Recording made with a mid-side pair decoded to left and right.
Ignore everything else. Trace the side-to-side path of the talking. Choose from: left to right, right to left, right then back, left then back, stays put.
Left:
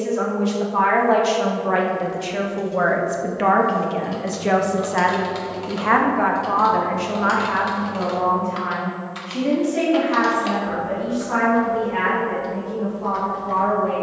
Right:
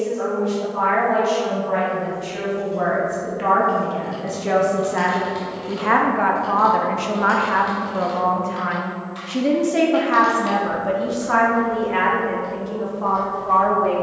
left to right.